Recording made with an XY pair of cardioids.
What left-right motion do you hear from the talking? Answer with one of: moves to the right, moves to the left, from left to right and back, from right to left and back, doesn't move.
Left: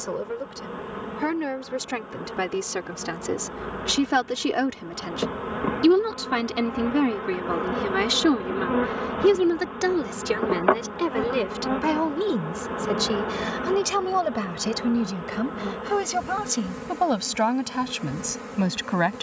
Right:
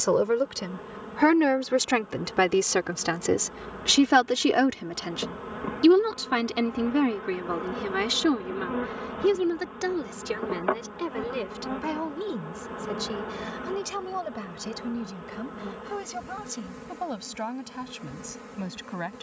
moves to the left.